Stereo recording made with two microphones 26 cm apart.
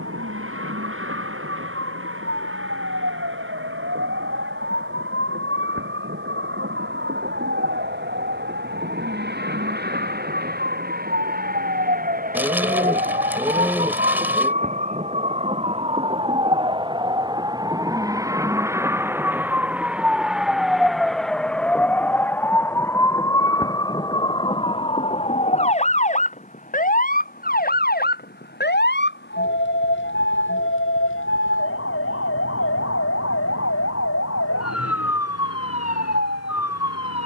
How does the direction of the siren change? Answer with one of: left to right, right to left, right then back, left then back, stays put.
right to left.